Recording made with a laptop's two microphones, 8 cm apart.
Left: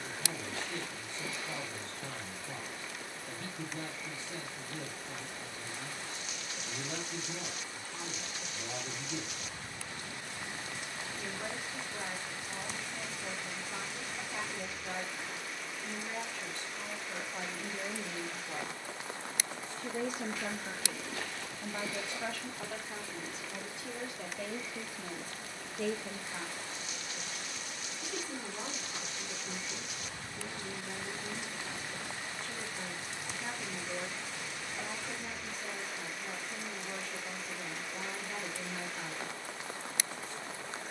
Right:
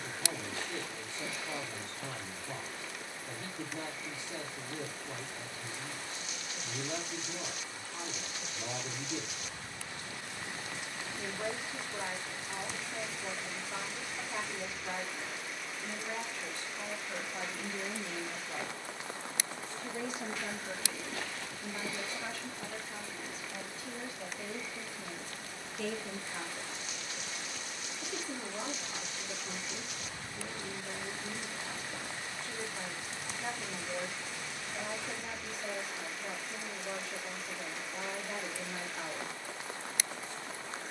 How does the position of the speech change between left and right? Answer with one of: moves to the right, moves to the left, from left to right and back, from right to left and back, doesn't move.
from right to left and back.